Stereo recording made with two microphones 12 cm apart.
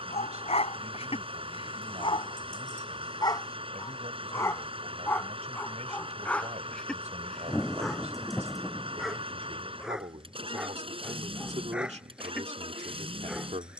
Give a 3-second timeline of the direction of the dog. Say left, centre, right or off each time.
left, left, centre, centre, centre.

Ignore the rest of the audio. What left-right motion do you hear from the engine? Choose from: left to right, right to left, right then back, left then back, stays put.
stays put.